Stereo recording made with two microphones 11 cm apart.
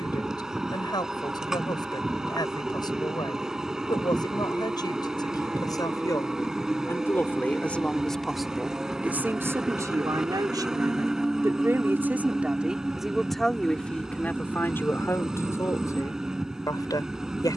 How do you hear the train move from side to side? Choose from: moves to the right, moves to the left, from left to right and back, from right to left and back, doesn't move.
doesn't move.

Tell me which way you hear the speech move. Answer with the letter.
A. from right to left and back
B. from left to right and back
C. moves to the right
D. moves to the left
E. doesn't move
B.